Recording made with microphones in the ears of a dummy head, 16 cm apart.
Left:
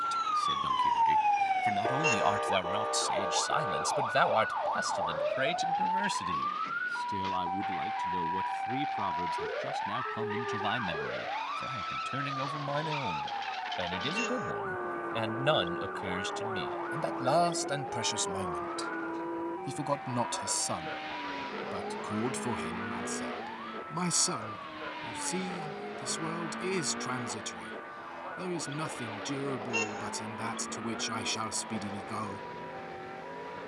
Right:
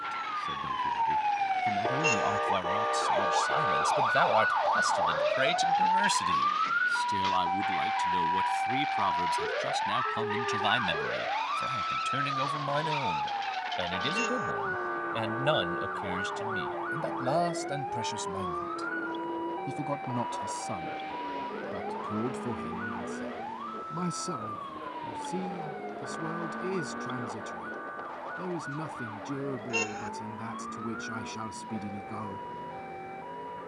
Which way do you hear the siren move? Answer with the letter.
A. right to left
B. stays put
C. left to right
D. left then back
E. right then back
C.